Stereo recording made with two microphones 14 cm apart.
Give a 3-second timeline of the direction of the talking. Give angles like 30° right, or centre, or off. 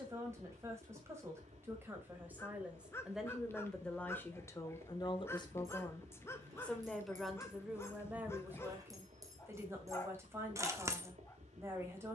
20° right, 20° left, 10° right, 20° right.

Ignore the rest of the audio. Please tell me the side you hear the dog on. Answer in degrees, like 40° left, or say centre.
20° left.